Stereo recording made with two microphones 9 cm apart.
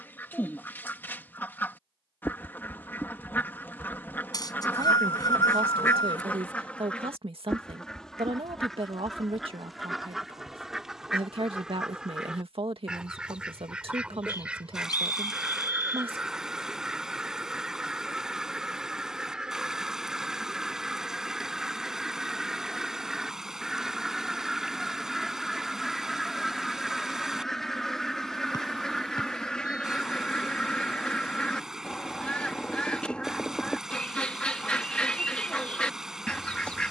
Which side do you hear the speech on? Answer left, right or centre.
right.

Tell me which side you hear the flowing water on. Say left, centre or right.
centre.